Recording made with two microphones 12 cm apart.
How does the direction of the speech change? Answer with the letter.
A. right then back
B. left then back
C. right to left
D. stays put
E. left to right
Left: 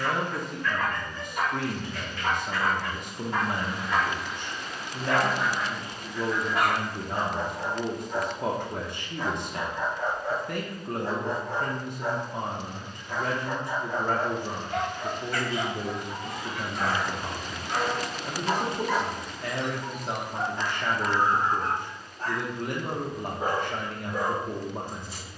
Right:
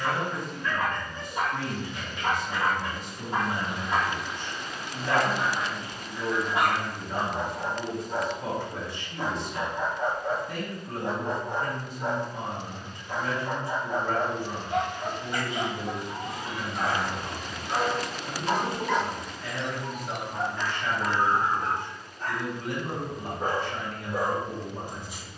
D.